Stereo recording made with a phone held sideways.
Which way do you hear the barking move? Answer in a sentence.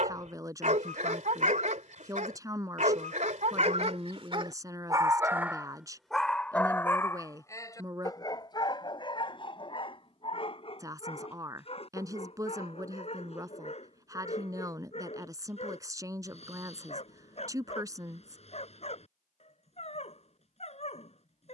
In this clip you hear the barking move to the left.